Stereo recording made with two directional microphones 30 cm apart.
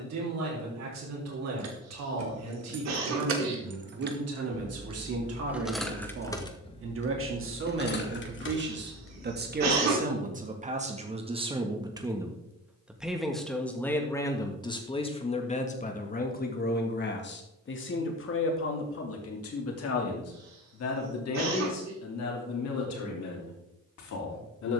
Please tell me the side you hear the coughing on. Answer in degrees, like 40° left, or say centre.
60° right.